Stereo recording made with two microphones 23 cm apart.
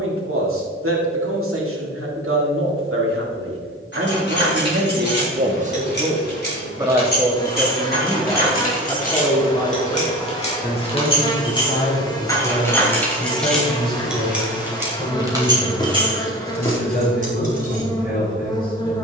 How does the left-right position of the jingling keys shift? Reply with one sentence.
In this clip you hear the jingling keys travel towards the right.